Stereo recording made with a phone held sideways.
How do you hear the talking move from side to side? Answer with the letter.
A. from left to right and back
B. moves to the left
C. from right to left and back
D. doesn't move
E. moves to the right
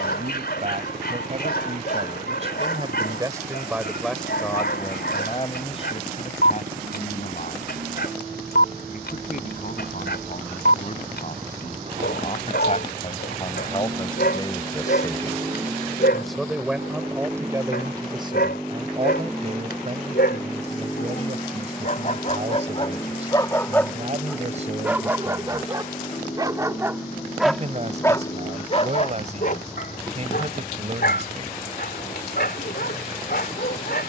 C.